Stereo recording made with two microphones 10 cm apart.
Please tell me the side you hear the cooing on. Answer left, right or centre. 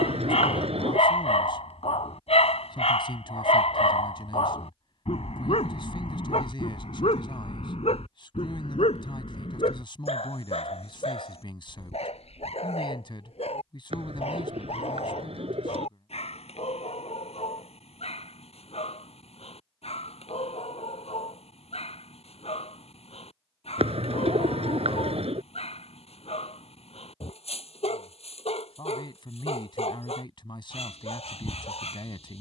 right.